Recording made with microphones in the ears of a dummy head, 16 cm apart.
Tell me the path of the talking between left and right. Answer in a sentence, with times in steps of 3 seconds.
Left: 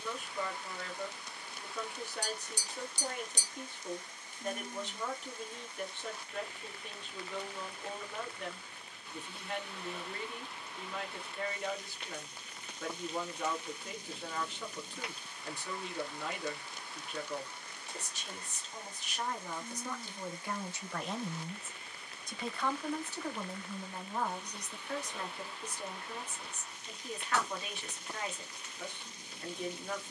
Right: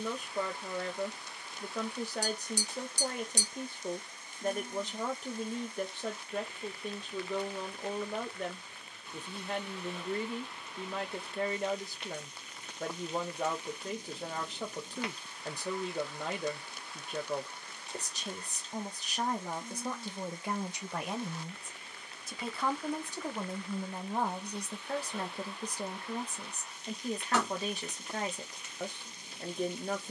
You can hear the talking on the right from 0 s, in the centre from 21 s and on the right from 24 s.